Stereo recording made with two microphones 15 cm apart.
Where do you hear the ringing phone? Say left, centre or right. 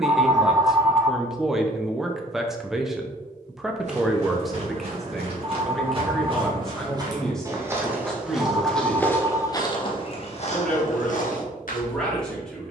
right.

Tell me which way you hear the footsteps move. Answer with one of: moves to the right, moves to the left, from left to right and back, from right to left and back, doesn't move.
moves to the left.